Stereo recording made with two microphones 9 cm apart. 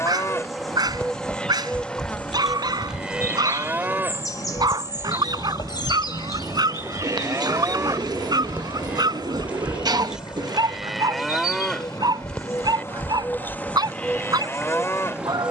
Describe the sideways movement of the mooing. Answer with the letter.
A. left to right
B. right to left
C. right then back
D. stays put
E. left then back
C.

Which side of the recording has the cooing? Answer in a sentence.
You can hear the cooing on the right.